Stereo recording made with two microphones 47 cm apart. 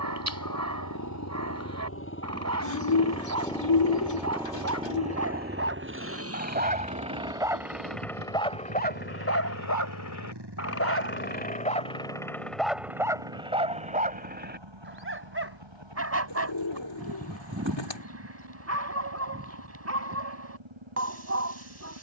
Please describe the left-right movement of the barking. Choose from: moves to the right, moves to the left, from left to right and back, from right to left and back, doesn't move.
from right to left and back.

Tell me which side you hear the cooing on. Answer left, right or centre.
left.